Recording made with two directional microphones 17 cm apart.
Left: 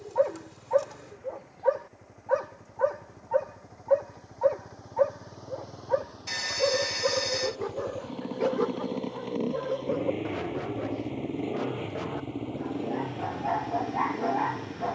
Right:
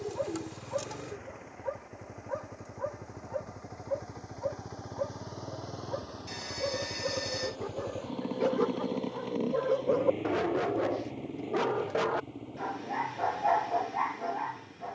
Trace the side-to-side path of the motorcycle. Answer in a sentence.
You can hear the motorcycle move from right to left.